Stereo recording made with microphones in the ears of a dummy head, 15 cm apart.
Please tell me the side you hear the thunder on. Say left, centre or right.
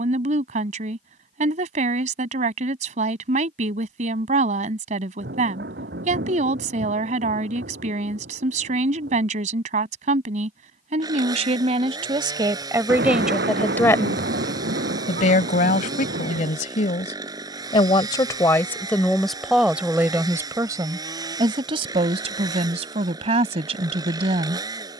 right.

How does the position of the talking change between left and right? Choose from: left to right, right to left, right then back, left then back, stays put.
left then back.